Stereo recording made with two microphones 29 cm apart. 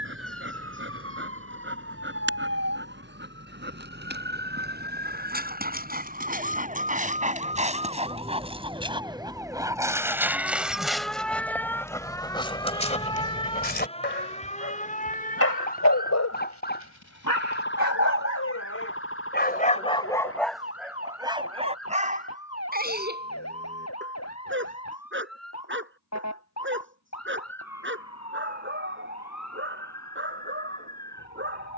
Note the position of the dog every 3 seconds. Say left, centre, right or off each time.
right, right, right, centre, left, left, left, right, right, right, right.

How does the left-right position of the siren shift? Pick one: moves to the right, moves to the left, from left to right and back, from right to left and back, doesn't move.
moves to the left.